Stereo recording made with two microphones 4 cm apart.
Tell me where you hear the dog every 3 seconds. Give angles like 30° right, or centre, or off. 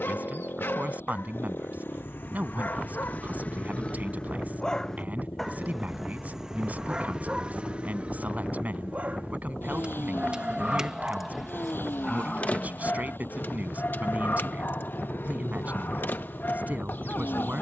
60° left, 20° left, 30° right, 20° right, 50° left, 60° left.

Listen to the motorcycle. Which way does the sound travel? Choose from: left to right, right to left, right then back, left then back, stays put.
stays put.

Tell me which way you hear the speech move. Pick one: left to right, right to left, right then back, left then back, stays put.
stays put.